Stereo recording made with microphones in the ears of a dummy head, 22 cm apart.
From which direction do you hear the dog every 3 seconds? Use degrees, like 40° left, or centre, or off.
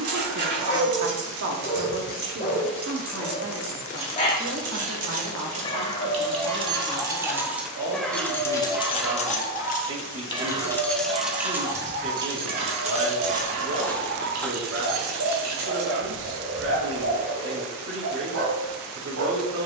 30° left, 30° left, 10° left, 20° right, 50° right, 70° right, 70° right.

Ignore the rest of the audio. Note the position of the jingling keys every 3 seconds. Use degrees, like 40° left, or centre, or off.
50° right, 40° right, 10° right, 10° left, 30° right, 50° right, off.